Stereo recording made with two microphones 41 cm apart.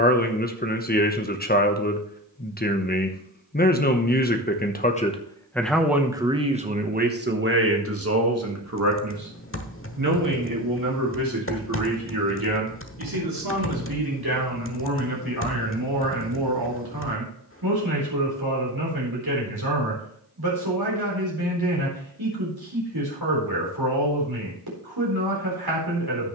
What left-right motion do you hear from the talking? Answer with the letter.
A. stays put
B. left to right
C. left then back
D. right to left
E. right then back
B.